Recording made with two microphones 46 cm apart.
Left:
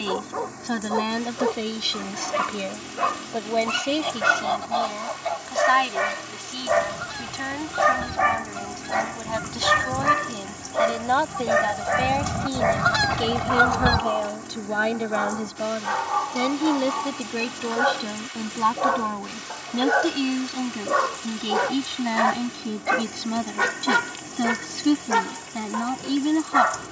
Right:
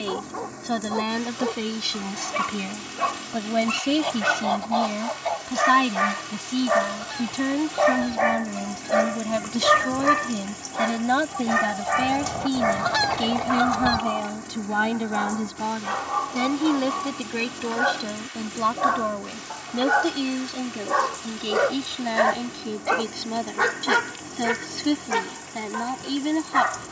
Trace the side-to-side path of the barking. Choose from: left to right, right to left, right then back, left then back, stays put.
right then back.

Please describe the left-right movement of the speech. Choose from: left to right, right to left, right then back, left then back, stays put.
right then back.